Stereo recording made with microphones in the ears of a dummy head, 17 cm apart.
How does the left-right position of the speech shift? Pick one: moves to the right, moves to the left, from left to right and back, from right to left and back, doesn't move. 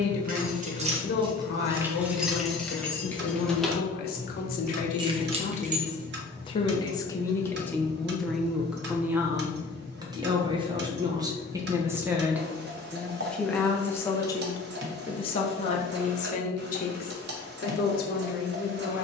from left to right and back.